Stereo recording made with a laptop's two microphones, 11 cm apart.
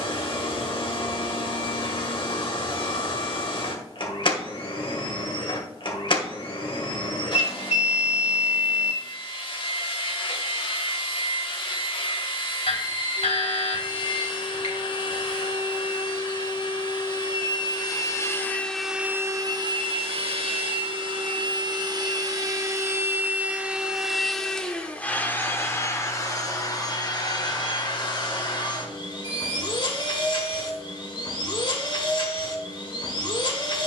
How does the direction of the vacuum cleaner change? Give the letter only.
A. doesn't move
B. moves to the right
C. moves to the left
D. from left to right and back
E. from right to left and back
D.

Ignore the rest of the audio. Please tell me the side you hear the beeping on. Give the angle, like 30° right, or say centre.
70° left.